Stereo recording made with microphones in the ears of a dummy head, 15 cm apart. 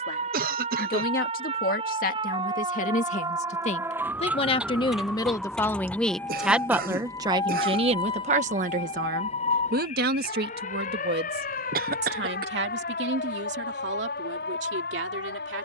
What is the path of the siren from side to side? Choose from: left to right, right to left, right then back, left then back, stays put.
right to left.